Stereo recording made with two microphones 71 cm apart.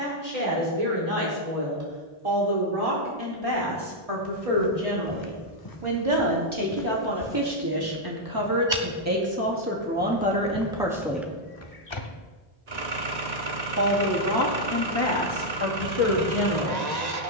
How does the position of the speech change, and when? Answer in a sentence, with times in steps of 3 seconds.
In this clip you hear the speech on the right from 0 s, in the centre from 9 s and on the left from 12 s.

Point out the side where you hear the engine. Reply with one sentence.
In this clip you hear the engine on the right.